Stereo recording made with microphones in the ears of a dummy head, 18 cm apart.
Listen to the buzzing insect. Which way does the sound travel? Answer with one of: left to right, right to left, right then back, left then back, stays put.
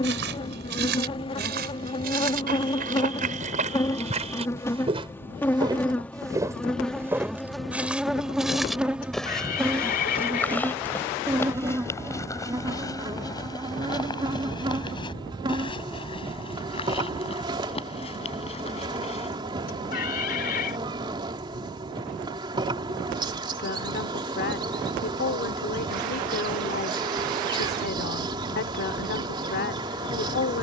left to right.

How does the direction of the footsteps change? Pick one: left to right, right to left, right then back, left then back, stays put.
right to left.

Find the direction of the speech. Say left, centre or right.
left.